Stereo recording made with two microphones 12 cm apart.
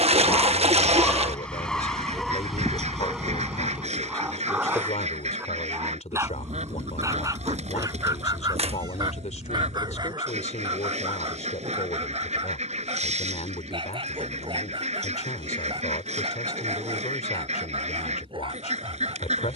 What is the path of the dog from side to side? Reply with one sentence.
In this clip you hear the dog move to the right.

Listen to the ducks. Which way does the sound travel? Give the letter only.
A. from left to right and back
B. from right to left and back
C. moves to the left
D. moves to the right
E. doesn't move
E.